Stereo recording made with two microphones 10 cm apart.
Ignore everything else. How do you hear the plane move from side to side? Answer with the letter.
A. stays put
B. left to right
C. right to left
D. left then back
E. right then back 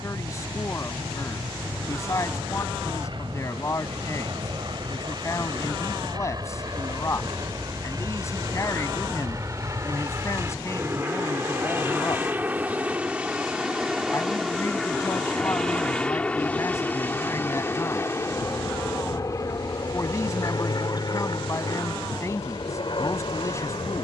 C.